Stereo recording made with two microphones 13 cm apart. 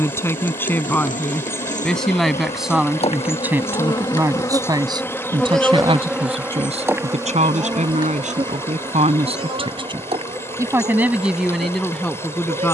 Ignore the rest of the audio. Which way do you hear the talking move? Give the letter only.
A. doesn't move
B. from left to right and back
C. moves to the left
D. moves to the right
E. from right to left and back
B.